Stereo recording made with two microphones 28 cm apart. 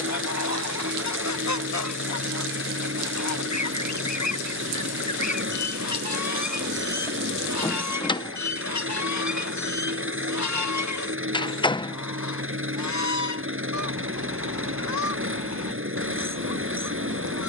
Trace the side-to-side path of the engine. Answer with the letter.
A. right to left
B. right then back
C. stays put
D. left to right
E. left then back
C.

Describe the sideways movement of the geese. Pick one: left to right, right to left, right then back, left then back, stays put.
stays put.